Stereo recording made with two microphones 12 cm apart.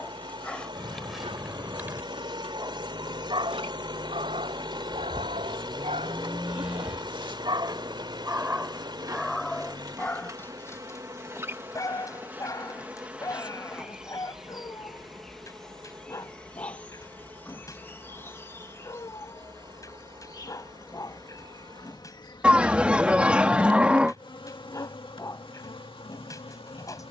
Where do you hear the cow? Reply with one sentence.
In this clip you hear the cow in the centre.